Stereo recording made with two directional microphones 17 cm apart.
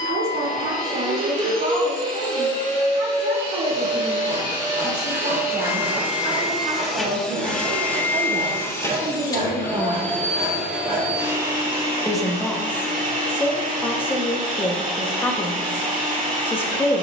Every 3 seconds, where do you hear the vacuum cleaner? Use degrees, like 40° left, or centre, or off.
50° right, 30° right, 10° left, centre, 50° right, 50° right.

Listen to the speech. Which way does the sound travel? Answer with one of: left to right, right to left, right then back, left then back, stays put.
right to left.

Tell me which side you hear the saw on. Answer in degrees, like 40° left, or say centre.
60° right.